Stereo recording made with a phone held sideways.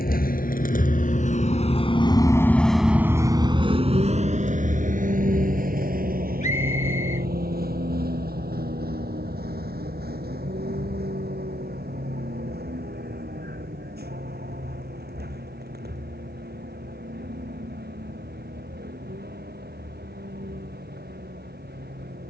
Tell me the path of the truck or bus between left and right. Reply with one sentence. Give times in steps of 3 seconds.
You can hear the truck or bus on the left from 0 s and on the right from 3 s.